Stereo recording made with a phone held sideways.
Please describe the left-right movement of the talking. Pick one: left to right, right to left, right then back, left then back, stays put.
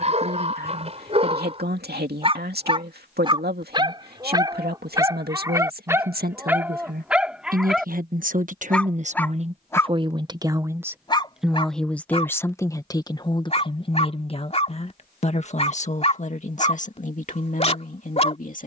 right to left.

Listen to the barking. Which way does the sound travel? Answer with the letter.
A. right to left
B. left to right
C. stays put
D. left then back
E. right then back
A.